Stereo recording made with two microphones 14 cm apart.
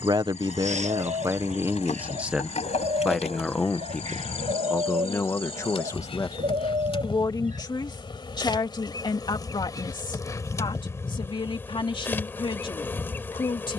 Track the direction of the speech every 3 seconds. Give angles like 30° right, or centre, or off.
20° right, 10° left, 30° left, 40° left, 40° left.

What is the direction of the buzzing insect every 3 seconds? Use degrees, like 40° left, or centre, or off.
60° left, 50° left, 40° left, 20° left, 20° left.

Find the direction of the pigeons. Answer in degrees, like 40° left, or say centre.
60° right.